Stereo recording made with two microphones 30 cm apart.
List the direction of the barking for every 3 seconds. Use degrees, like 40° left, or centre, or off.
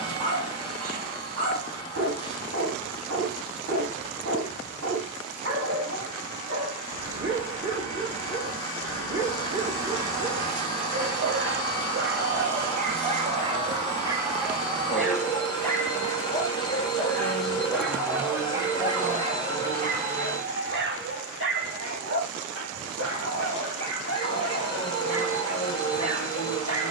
50° right, 50° right, 50° right, 50° right, 20° right, 10° left, 20° right, 50° right, 50° right.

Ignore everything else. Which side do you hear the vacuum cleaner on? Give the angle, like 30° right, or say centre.
10° left.